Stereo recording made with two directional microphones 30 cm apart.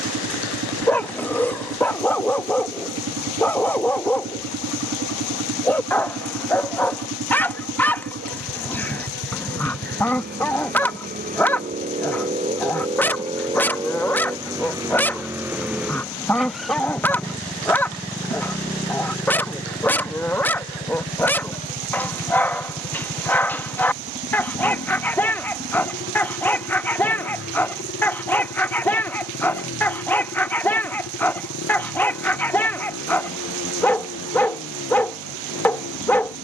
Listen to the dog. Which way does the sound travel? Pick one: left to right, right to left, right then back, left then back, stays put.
stays put.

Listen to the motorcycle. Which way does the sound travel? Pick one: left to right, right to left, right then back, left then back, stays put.
right to left.